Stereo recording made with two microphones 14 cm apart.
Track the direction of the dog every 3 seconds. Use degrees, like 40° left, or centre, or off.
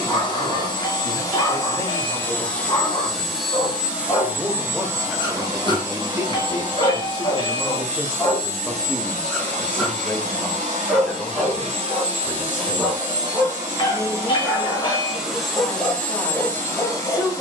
30° left, 30° left, 20° left, centre, centre, 20° left.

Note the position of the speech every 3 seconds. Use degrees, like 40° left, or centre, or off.
20° left, centre, 20° right, 10° left, 20° left, 20° left.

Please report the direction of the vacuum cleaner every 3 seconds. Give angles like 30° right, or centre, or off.
20° left, 10° right, 40° right, 50° right, 30° right, 10° left.